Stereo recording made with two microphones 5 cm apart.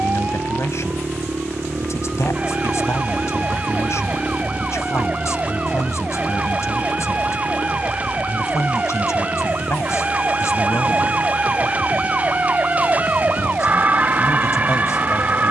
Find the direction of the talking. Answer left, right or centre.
left.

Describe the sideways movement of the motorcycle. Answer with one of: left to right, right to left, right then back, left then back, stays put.
right to left.